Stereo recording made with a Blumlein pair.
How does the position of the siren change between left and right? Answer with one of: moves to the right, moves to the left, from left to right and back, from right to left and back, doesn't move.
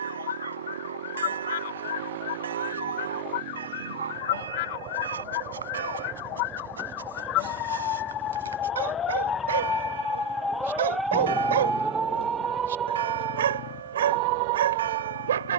moves to the right.